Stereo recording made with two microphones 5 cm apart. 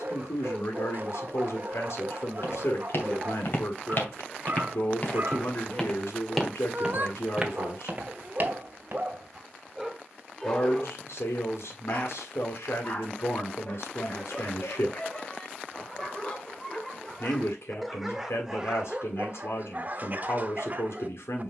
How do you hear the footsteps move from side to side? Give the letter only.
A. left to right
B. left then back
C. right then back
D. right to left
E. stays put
A.